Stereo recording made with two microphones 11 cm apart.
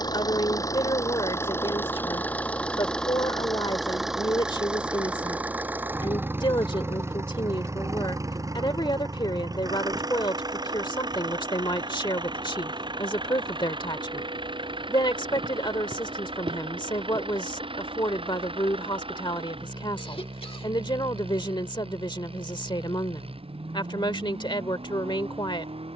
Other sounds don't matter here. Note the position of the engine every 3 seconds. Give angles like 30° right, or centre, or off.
20° left, 10° right, 20° right, 40° right, 40° right, 50° right, 50° right, 50° right, 50° right.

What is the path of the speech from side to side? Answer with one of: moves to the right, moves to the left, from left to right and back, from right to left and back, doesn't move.
doesn't move.